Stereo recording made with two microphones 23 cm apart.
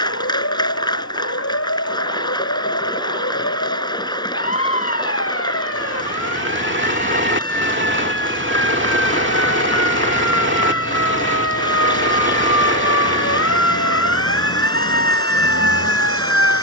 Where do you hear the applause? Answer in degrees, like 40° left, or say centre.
20° left.